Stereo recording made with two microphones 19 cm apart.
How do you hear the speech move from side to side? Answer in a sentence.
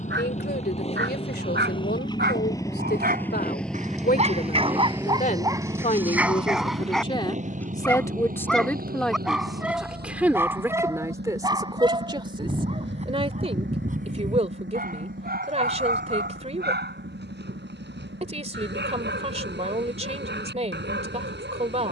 In this clip you hear the speech go from the left side to the right.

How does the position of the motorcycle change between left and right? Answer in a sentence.
You can hear the motorcycle go from the left side to the right.